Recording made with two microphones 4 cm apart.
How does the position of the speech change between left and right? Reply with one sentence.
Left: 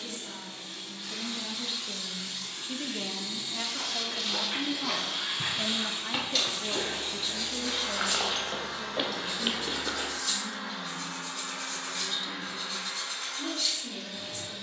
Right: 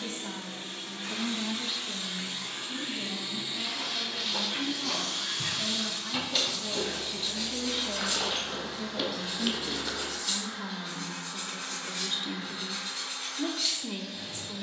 You can hear the speech go left and come back.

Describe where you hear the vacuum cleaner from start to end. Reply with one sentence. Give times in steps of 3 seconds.
In this clip you hear the vacuum cleaner on the right from 0 s, in the centre from 3 s and on the left from 6 s.